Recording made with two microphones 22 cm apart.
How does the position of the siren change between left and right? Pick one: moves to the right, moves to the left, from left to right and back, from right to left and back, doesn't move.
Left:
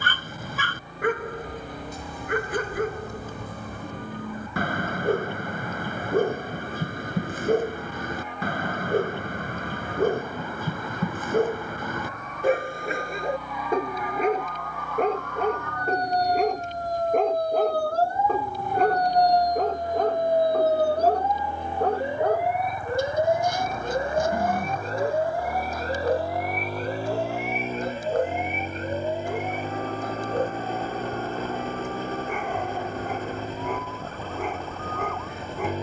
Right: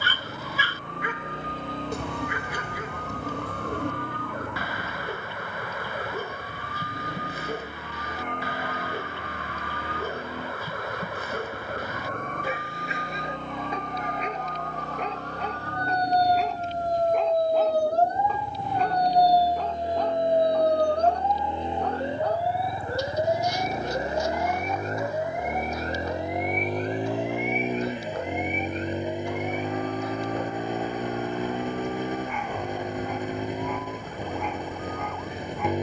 moves to the left.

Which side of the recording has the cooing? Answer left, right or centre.
right.